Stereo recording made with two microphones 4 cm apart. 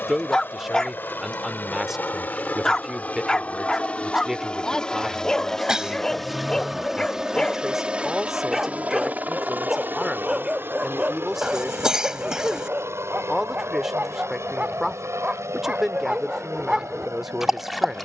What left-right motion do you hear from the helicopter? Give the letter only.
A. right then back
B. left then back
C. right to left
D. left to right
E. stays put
D.